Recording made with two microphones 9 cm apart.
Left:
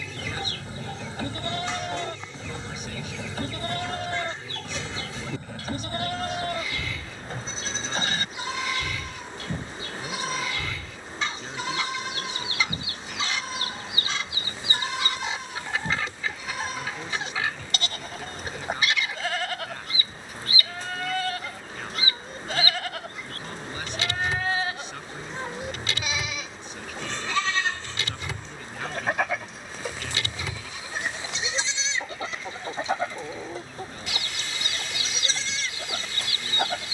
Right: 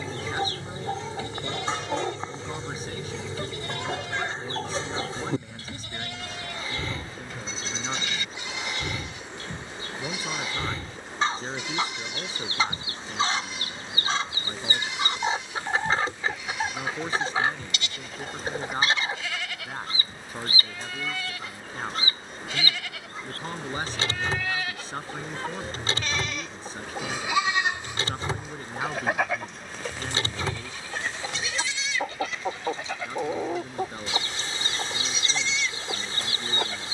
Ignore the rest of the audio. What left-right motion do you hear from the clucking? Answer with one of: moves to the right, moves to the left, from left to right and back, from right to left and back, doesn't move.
doesn't move.